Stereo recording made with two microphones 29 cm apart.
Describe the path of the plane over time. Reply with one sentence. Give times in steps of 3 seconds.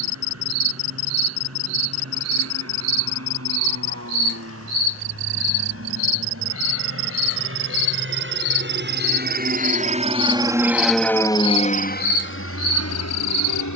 You can hear the plane on the right from 0 s, in the centre from 9 s and on the left from 12 s.